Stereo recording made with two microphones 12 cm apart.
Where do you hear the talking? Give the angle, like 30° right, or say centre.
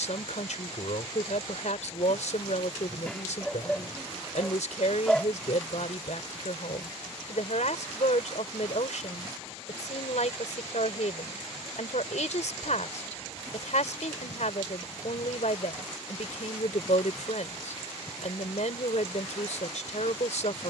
90° left.